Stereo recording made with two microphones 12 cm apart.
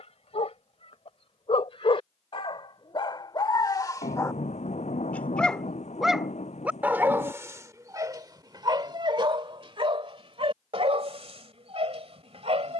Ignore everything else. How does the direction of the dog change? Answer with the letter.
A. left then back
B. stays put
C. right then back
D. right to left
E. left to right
E.